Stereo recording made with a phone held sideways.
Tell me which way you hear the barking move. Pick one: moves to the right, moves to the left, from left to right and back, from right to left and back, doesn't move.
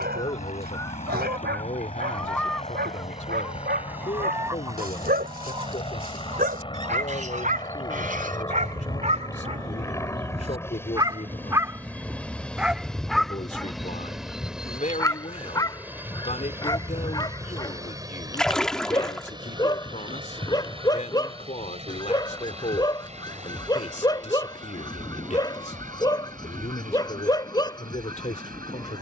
moves to the left.